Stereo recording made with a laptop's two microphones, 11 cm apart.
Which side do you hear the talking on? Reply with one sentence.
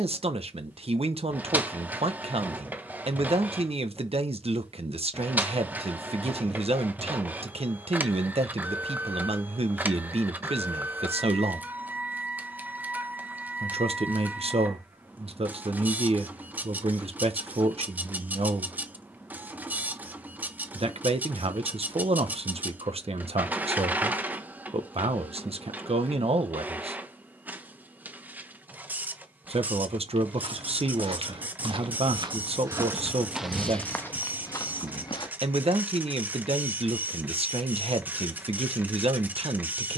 In this clip you hear the talking on the right.